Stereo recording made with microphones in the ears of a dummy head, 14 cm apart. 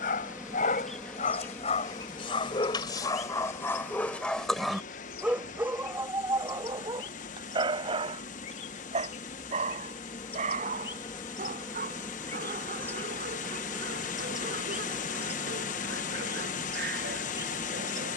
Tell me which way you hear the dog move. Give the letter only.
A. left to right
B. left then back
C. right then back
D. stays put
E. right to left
A.